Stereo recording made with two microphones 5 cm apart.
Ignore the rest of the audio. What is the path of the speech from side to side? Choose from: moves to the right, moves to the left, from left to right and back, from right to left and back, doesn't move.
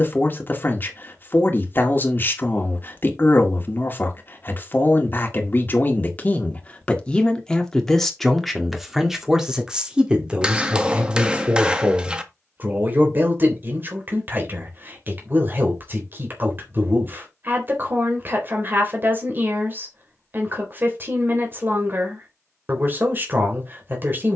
moves to the right.